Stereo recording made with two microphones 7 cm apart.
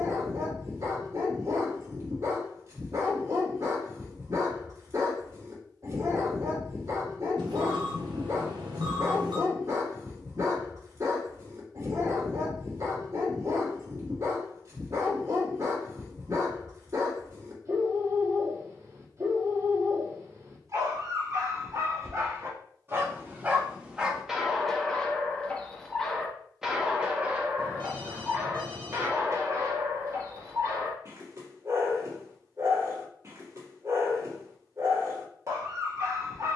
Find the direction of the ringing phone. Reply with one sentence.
In this clip you hear the ringing phone on the right.